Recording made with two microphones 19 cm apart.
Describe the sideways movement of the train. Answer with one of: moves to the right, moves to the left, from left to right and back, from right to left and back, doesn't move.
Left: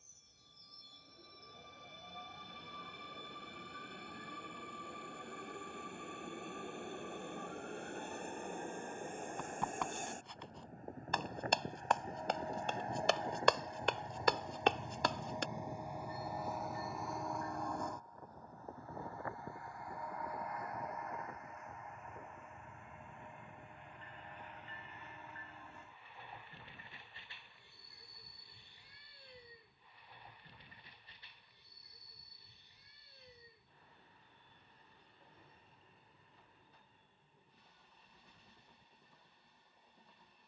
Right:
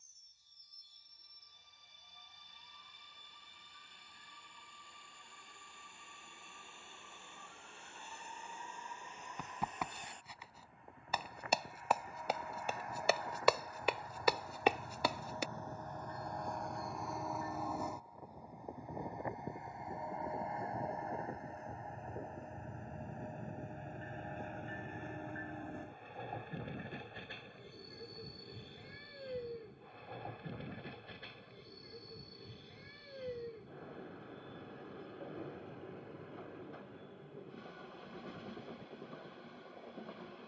moves to the right.